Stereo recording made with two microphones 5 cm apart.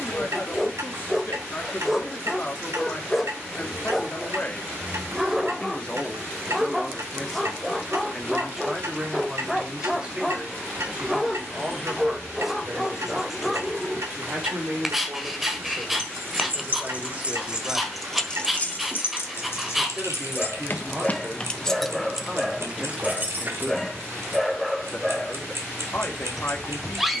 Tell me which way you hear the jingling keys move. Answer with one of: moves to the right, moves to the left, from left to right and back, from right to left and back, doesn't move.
from right to left and back.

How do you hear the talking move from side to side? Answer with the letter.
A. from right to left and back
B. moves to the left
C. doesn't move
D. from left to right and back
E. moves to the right
D.